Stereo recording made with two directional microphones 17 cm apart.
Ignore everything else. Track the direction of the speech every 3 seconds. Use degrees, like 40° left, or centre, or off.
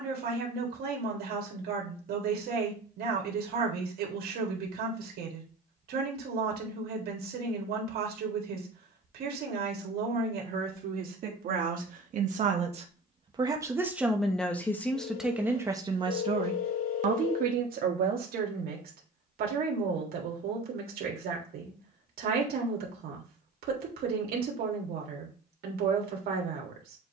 70° right, 70° right, 70° right, 60° right, 20° right, 30° right, 60° right, 70° right, 70° right.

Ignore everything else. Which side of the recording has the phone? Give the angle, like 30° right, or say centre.
60° left.